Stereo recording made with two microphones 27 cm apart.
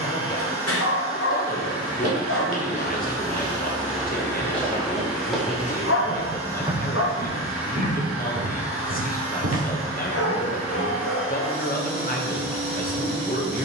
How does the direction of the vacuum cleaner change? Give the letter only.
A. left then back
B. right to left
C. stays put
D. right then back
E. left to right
C.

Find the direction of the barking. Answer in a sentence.
You can hear the barking on the left.